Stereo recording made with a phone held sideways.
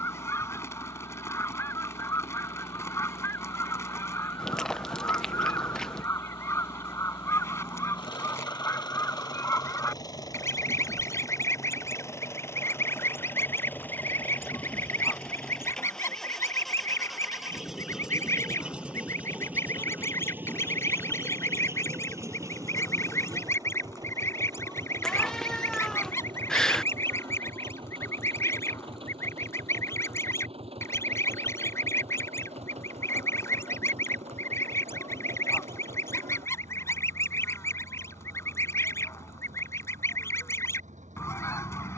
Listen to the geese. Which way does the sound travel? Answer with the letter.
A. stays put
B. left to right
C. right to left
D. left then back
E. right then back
A.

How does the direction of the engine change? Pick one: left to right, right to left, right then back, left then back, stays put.
left to right.